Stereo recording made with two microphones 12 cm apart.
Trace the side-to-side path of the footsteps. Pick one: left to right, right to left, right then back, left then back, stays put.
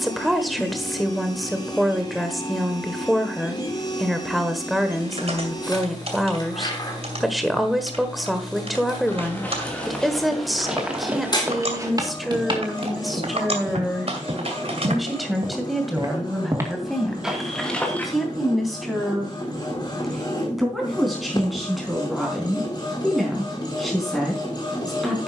right then back.